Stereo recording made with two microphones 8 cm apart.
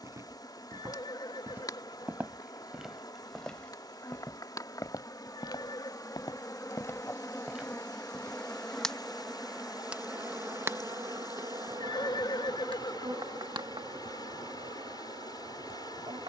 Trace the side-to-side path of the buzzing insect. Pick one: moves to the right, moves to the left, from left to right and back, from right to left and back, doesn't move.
moves to the right.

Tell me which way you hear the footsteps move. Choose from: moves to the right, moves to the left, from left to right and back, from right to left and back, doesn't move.
from right to left and back.